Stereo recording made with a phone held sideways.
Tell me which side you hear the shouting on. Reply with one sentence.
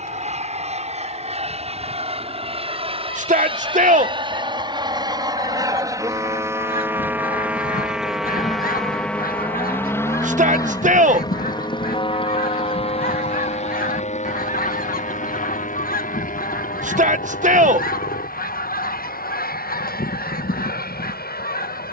You can hear the shouting on the right.